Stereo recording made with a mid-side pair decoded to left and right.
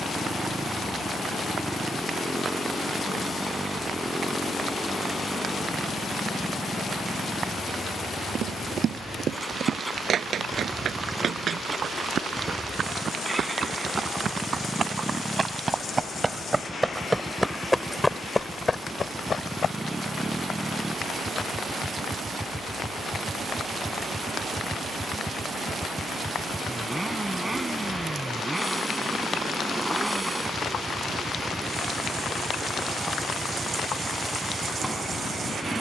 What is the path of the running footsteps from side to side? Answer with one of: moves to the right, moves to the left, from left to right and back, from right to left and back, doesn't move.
moves to the left.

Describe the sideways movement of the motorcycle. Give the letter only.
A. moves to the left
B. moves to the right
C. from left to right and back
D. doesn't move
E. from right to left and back
D.